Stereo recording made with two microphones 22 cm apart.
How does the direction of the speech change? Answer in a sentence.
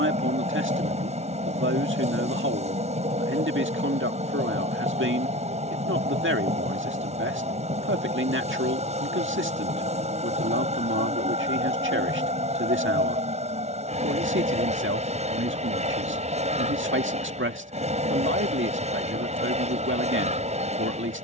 You can hear the speech stay in one place.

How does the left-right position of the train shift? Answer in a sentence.
You can hear the train stay put.